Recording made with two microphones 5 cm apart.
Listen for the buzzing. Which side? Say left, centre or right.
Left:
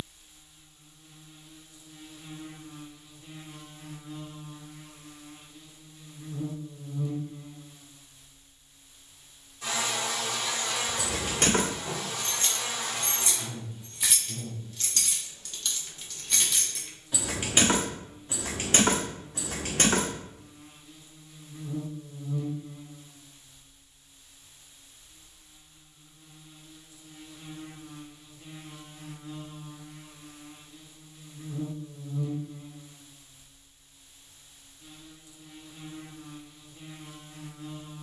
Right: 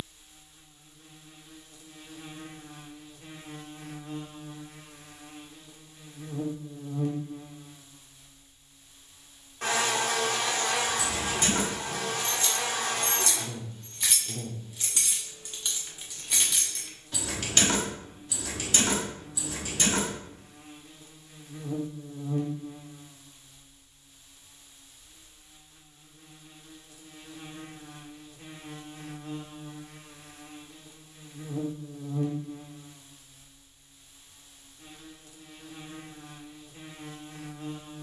right.